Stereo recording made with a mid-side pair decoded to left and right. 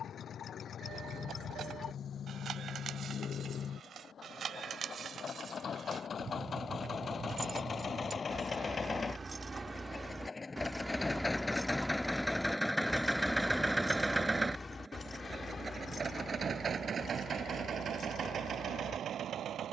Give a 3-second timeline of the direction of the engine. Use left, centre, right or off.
left, left, left, left, centre, right, right.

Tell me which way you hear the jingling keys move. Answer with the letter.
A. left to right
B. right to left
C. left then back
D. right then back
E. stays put
B.